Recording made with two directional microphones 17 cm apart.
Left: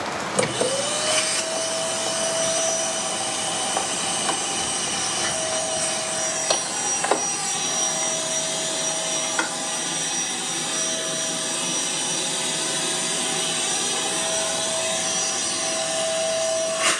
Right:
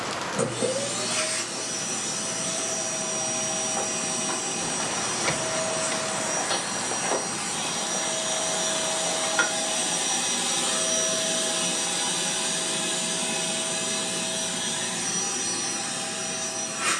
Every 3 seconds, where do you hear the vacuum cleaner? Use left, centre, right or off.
left, left, left, centre, left, left.